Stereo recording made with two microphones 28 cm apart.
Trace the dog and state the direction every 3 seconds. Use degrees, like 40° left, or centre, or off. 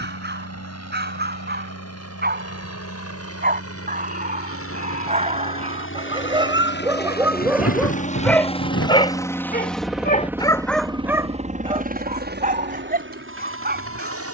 40° right, 30° right, 10° right, 10° left, 30° right.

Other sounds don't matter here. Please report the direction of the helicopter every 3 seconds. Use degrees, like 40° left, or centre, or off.
60° left, 50° left, 30° left, 10° right, 40° right.